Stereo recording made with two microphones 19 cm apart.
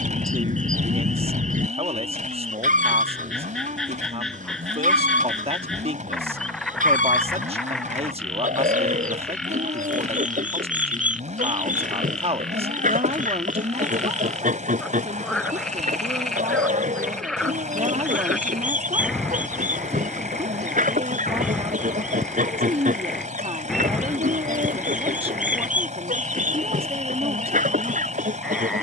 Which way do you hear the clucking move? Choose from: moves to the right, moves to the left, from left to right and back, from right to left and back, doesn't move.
doesn't move.